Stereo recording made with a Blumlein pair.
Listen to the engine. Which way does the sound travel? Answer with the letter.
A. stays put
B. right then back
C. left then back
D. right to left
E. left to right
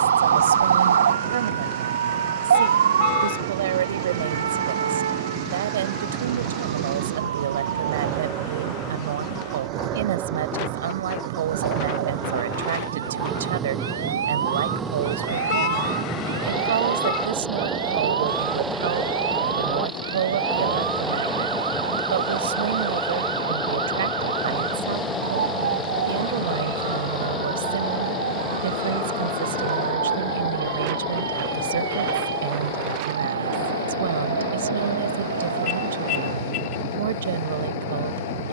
D.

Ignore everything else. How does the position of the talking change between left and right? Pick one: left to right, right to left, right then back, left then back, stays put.
stays put.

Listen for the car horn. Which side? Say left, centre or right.
left.